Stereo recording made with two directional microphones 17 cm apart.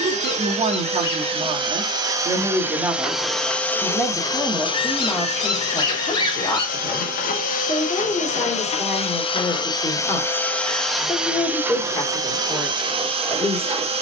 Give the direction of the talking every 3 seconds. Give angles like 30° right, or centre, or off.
40° right, centre, 20° left, 20° left, 20° left.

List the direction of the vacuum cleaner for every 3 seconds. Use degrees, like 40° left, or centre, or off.
30° right, 20° left, 50° left, 10° left, 30° right.